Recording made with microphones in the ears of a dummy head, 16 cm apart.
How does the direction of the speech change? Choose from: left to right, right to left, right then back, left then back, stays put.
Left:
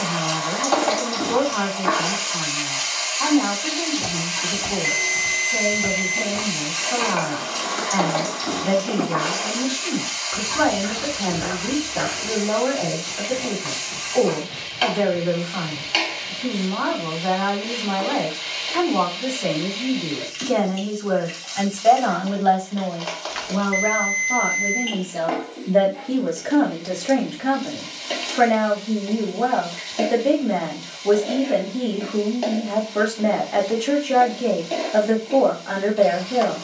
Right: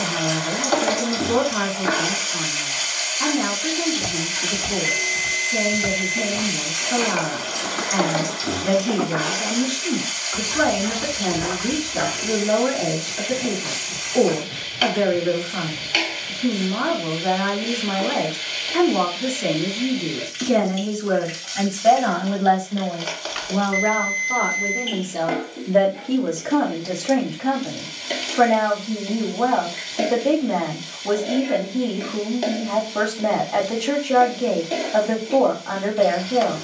right to left.